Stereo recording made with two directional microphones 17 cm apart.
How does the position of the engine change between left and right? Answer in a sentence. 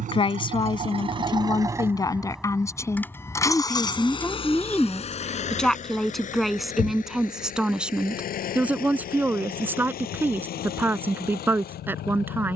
In this clip you hear the engine move to the left.